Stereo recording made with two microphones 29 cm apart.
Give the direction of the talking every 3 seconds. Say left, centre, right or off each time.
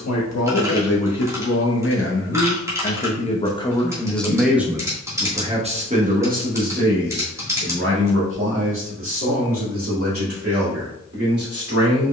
left, centre, right, right.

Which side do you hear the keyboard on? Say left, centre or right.
centre.